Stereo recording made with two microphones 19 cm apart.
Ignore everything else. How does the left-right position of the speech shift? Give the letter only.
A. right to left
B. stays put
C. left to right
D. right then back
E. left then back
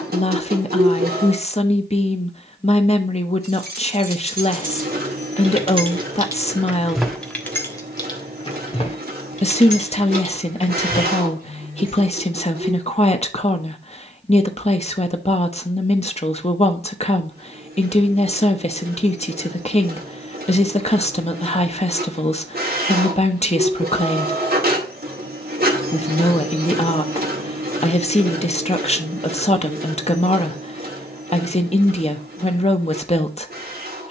B.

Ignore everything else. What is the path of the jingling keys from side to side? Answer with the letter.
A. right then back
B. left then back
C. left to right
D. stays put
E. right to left
E.